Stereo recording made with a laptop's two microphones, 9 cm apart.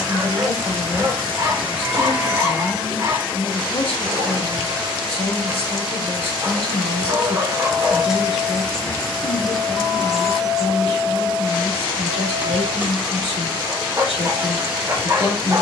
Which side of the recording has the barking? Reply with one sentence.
In this clip you hear the barking on the right.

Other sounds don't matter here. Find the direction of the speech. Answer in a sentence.
In this clip you hear the speech on the left.